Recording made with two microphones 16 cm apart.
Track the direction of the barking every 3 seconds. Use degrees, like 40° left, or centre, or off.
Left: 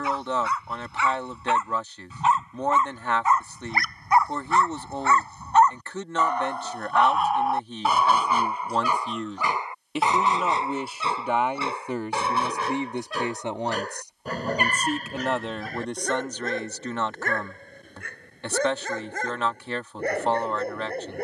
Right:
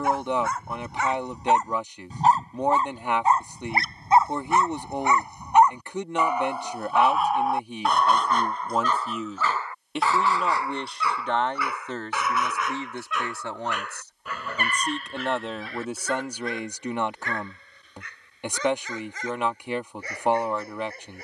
40° right, 20° right, centre, 20° left, 40° left, 40° left, 50° left.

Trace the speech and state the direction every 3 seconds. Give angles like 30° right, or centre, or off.
20° right, 20° right, 10° right, centre, 20° left, 10° right, 20° right.